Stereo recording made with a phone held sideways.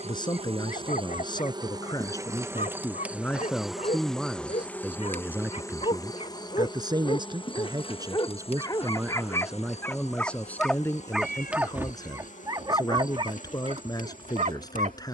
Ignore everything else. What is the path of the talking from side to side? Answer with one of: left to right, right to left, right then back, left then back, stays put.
right then back.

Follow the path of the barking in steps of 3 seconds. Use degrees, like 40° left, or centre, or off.
50° left, 50° left, 30° left, 10° left, 40° right.